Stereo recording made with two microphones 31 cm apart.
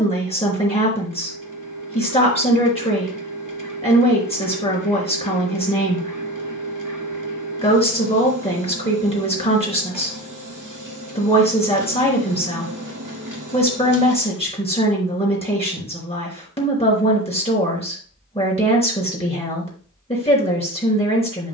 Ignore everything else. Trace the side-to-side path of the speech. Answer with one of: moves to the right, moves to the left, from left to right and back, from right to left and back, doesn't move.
doesn't move.